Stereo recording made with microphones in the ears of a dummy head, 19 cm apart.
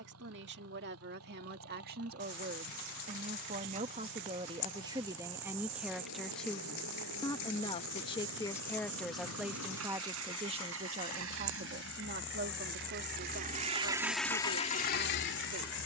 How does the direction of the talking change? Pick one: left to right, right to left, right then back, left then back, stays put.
left then back.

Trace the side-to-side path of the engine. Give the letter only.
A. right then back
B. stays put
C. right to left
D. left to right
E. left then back
C.